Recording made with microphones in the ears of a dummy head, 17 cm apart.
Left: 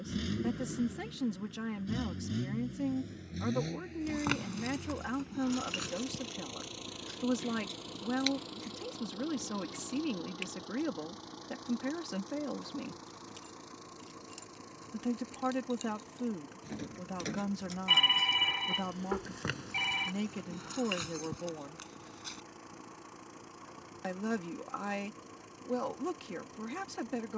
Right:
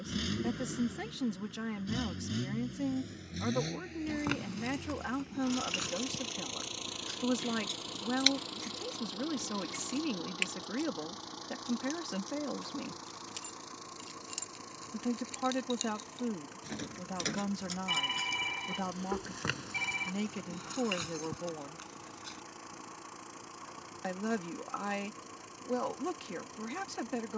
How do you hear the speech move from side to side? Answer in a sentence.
In this clip you hear the speech stay in one place.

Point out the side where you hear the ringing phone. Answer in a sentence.
You can hear the ringing phone on the left.